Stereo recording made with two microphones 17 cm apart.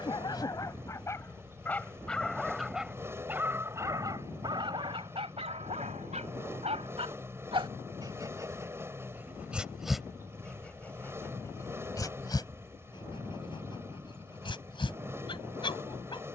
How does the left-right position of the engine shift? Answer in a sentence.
You can hear the engine stay put.